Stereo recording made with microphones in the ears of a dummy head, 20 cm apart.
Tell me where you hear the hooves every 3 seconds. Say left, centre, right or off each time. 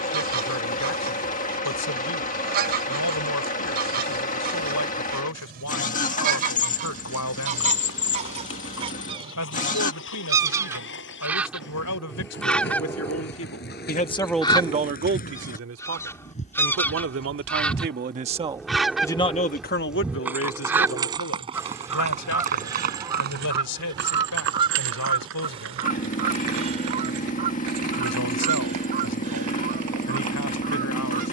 off, off, left, left, left, left, centre, right, right, right, right.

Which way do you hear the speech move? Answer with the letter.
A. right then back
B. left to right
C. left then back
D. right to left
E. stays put
A.